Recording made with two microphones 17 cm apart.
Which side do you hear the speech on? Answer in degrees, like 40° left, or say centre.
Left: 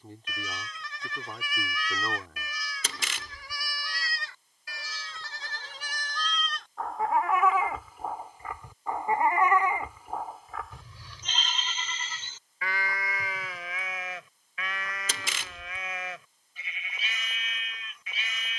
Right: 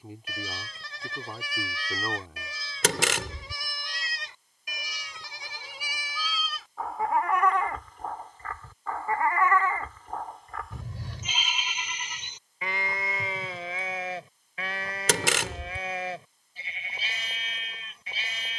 10° right.